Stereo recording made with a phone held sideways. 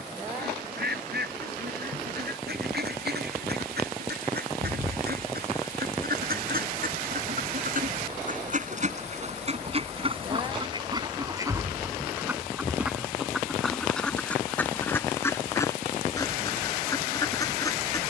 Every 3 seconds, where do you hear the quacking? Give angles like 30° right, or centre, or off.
80° right, 80° right, 60° right, 30° right, centre, 20° left.